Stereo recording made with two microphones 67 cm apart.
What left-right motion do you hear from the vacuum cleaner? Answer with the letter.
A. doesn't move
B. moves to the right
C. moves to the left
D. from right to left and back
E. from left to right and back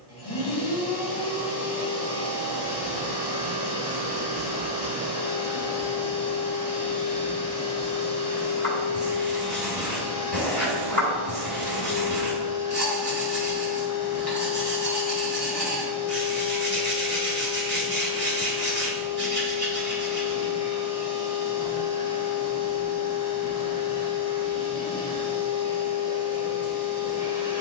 A.